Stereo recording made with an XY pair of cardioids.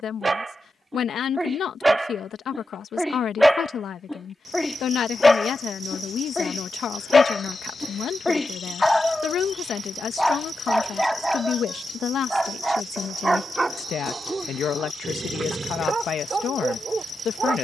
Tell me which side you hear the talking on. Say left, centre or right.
left.